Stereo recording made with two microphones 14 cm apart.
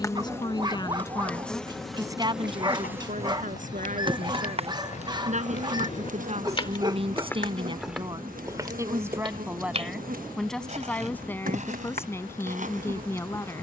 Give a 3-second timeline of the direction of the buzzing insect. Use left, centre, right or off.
centre, right, right, right, right.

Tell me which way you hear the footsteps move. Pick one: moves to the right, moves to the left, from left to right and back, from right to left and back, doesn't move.
moves to the right.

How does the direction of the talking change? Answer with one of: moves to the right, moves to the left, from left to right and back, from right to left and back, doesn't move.
from left to right and back.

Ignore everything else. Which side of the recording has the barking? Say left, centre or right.
right.